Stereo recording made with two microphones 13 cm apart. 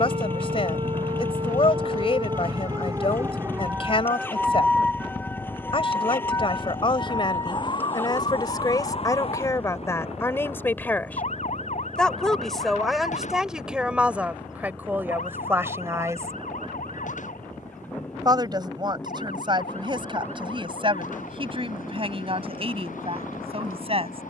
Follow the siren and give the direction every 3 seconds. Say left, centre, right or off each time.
right, centre, left, left, left, left, left, left.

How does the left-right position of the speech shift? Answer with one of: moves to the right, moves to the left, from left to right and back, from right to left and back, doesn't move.
moves to the right.